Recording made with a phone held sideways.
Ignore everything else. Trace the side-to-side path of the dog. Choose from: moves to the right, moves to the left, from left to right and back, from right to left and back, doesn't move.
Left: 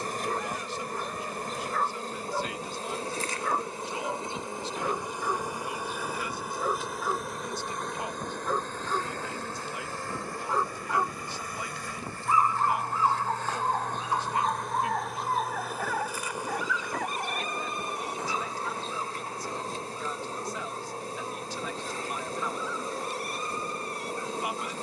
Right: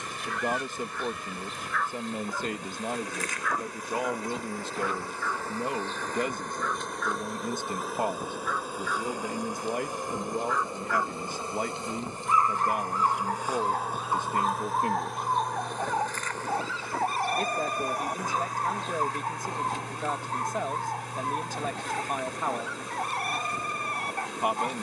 moves to the right.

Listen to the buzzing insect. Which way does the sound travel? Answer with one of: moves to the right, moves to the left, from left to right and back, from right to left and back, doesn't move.
from left to right and back.